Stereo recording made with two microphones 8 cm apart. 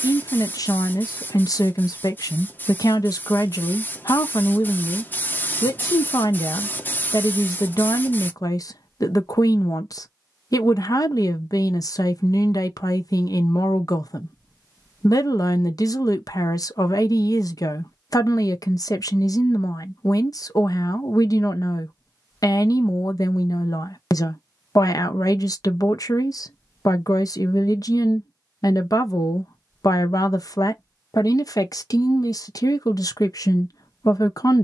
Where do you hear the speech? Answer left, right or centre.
left.